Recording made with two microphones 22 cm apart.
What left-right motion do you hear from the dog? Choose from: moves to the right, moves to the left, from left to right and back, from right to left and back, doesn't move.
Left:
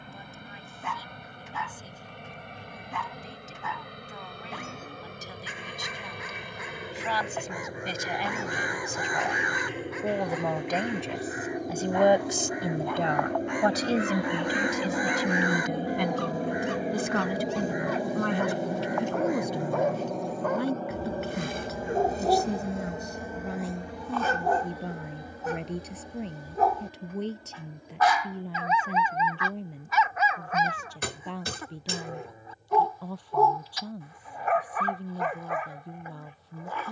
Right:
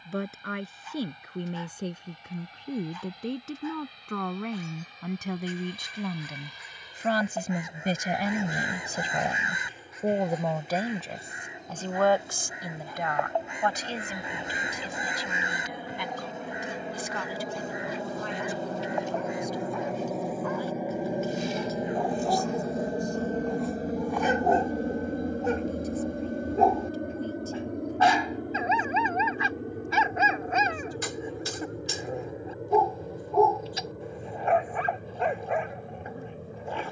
moves to the right.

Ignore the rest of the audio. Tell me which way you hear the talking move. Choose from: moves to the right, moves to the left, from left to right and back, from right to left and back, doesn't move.
moves to the left.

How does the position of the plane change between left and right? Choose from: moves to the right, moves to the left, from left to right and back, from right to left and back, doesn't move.
moves to the right.